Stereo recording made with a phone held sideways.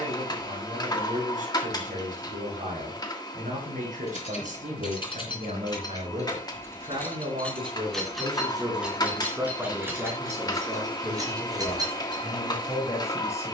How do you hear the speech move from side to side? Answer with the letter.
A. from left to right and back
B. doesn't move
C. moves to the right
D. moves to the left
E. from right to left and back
D.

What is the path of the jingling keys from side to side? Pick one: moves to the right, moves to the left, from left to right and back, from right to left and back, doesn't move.
moves to the right.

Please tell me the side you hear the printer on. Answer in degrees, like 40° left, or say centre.
30° left.